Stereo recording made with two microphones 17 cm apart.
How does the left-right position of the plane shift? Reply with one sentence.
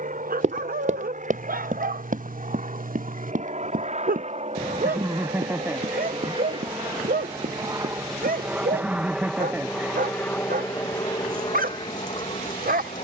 You can hear the plane move from right to left.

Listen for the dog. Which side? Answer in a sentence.
You can hear the dog on the right.